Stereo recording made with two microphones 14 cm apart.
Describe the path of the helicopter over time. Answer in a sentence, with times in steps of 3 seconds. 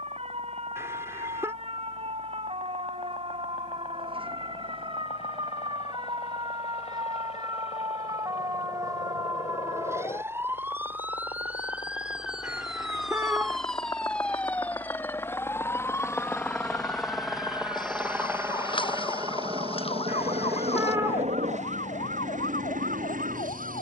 You can hear the helicopter on the left from 0 s, in the centre from 15 s and on the right from 18 s.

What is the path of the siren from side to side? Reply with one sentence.
You can hear the siren go from the right side to the left.